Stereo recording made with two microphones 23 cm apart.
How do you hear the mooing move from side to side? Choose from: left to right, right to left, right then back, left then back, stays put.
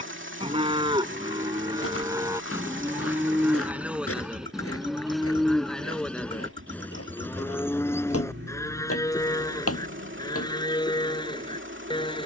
right to left.